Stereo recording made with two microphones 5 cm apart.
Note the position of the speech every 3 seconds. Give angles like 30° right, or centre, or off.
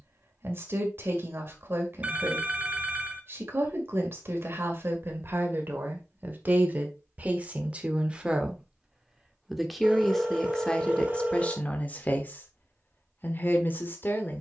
50° right, 40° right, 30° right, 10° left, 40° left.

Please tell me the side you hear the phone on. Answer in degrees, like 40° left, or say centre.
30° right.